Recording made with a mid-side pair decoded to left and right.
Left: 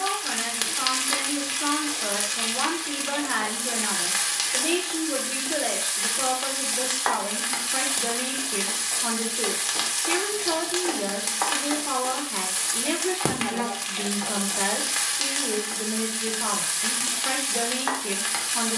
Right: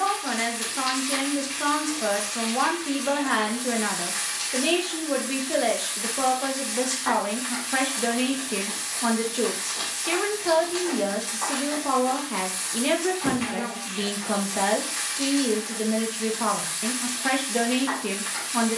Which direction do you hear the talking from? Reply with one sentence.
You can hear the talking on the right.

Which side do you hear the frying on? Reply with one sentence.
In this clip you hear the frying on the left.